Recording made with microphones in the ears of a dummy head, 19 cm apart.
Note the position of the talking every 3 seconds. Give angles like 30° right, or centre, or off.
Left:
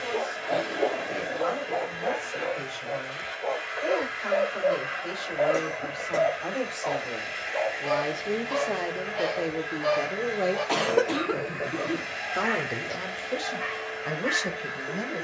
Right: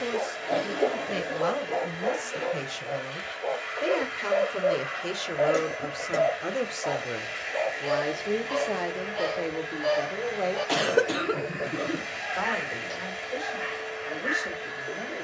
60° right, 40° right, 10° right, 20° left, 50° left.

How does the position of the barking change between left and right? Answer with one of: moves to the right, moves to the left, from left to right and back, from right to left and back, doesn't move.
doesn't move.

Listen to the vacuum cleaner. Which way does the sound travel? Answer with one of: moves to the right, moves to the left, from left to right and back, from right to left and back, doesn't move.
doesn't move.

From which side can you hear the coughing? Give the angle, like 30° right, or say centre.
10° right.